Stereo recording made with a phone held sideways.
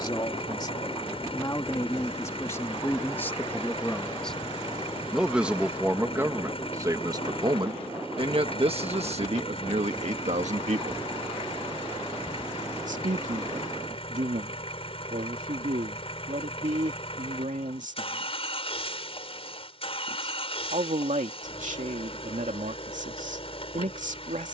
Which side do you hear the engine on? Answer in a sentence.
In this clip you hear the engine on the left.